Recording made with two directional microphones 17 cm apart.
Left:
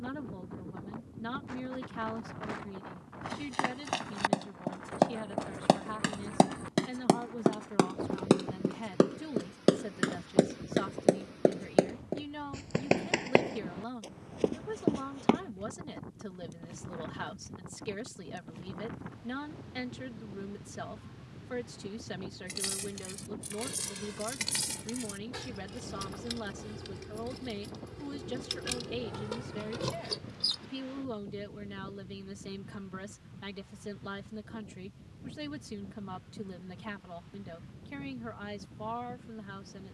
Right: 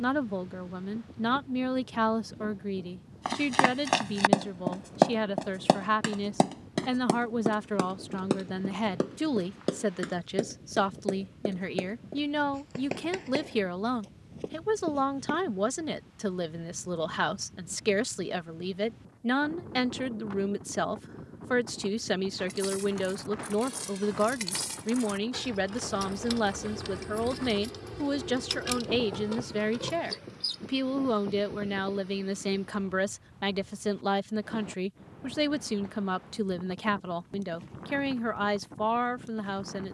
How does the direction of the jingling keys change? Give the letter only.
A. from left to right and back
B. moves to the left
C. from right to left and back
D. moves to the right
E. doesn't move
A.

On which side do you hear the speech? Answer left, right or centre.
right.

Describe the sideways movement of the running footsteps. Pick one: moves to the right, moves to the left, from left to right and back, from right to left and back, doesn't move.
moves to the left.